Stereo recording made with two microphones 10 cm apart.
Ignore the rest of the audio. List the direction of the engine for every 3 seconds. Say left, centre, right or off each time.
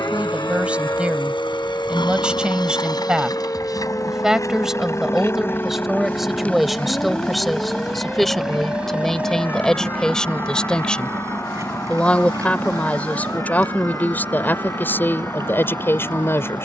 left, left, centre, right, right, right.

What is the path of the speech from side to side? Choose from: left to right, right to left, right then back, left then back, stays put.
right to left.